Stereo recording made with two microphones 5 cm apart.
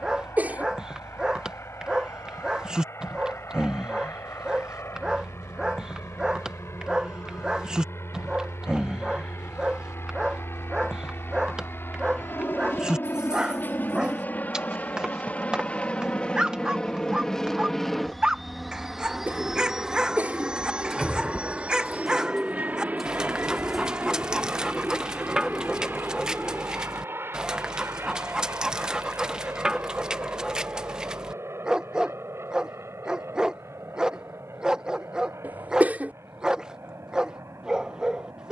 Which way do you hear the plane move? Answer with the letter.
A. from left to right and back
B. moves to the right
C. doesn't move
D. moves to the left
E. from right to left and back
B.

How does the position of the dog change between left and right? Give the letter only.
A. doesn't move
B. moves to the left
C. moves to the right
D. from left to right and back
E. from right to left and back
A.